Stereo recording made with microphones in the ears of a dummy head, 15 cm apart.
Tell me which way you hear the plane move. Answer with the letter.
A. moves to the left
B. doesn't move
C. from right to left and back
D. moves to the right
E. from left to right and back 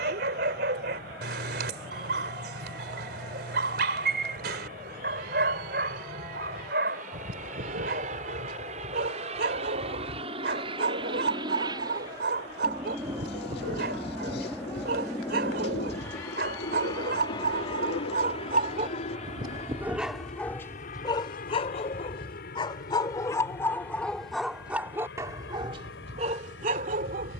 A.